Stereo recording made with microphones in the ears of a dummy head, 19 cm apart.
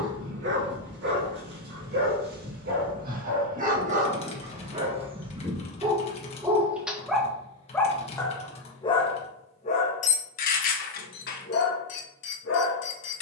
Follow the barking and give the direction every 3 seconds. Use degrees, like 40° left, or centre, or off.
50° right, 30° right, centre, 40° left, 60° left.